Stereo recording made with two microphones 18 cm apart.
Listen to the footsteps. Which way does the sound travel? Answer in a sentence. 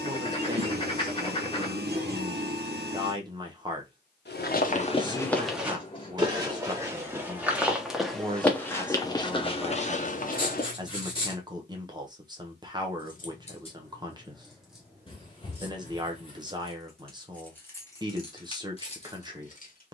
In this clip you hear the footsteps go right and come back.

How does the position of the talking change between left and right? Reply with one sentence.
In this clip you hear the talking stay in one place.